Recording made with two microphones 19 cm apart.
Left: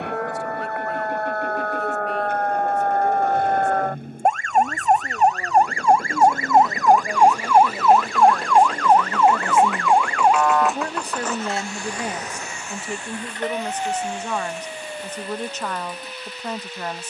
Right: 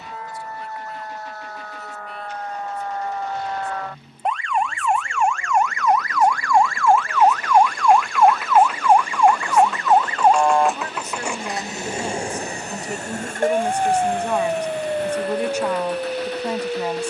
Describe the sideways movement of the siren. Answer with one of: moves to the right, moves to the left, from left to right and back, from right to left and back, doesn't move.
moves to the right.